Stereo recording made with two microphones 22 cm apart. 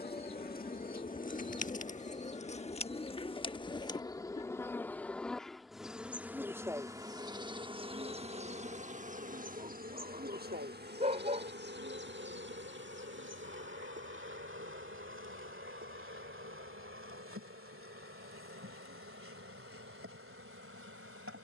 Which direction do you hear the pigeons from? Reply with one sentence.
You can hear the pigeons on the left.